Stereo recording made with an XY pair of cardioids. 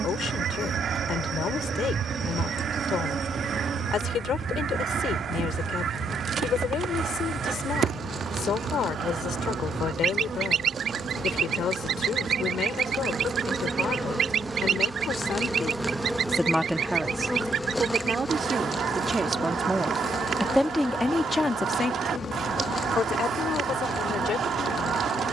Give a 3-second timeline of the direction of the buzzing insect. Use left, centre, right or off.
right, right, right, right, right, centre, left, left, left.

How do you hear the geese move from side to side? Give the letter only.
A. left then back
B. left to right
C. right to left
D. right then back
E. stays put
E.